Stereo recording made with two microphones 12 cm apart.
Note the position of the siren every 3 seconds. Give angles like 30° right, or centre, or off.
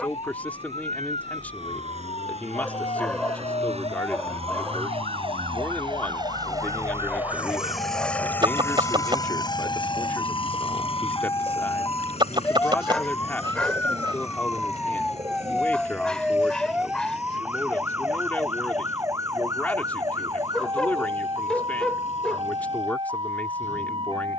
60° left, 50° left, 50° left, 30° left, 20° left, 10° right, 30° right, 40° right.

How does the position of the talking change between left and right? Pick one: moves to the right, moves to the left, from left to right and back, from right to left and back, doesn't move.
doesn't move.